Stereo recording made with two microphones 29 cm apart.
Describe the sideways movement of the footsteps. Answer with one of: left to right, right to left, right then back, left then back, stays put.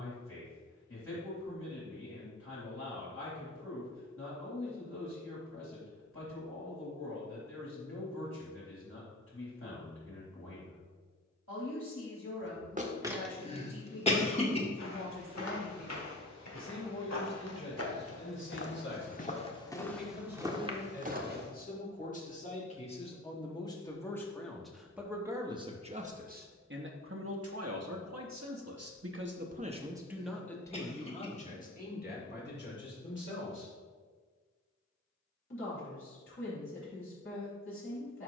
left then back.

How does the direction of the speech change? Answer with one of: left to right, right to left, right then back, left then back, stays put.
right then back.